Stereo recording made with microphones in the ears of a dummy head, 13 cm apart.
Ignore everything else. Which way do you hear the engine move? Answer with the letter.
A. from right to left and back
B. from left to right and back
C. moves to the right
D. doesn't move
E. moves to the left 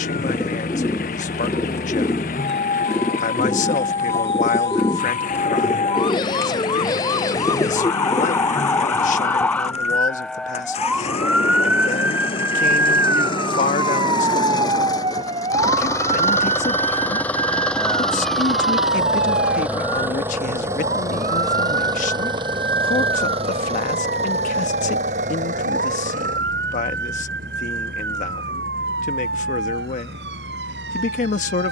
C.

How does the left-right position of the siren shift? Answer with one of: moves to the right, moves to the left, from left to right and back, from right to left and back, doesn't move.
moves to the right.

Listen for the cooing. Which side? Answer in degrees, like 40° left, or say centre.
20° left.